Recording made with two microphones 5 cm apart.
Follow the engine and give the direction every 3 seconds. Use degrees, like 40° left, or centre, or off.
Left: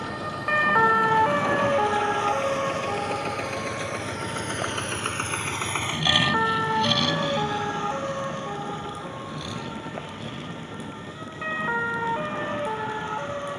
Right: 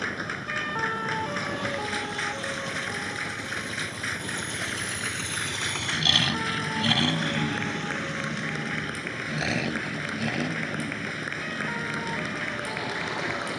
70° left, 50° left, 30° right, 70° right, 70° right.